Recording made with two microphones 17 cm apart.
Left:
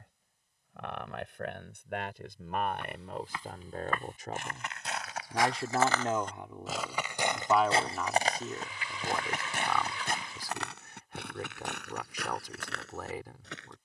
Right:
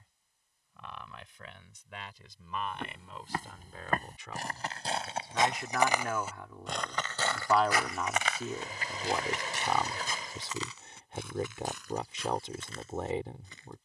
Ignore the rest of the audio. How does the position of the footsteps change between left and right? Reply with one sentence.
You can hear the footsteps move from right to left.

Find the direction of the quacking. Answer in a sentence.
In this clip you hear the quacking on the right.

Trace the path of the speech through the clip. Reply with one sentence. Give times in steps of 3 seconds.
You can hear the speech on the left from 0 s, in the centre from 6 s and on the right from 9 s.